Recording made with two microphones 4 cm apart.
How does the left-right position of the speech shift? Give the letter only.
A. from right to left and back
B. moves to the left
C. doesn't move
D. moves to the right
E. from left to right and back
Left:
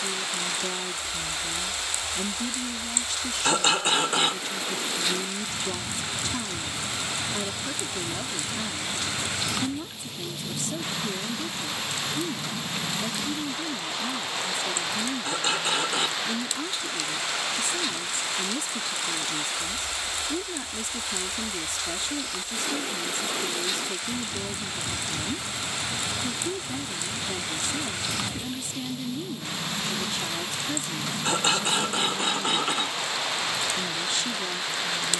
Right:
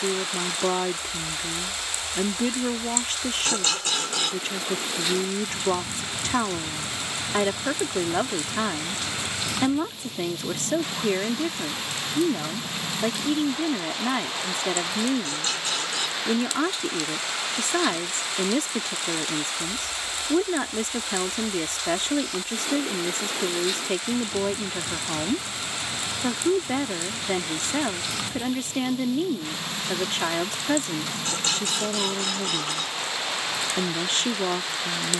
C.